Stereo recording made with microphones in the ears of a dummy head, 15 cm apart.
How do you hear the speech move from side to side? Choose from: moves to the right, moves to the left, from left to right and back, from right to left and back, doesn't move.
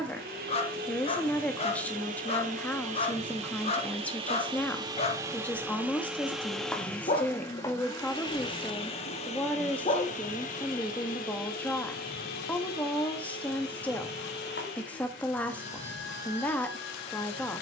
doesn't move.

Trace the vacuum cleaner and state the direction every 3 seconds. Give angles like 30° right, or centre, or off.
50° right, 30° right, 20° left, 50° left, 60° left, 70° left.